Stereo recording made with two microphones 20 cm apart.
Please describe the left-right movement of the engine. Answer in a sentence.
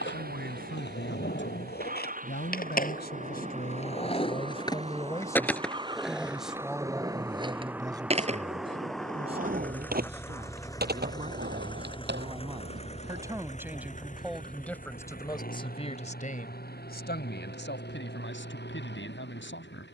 You can hear the engine move to the left.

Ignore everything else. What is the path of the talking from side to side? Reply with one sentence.
In this clip you hear the talking go right and come back.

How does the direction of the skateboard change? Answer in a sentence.
You can hear the skateboard go from the left side to the right.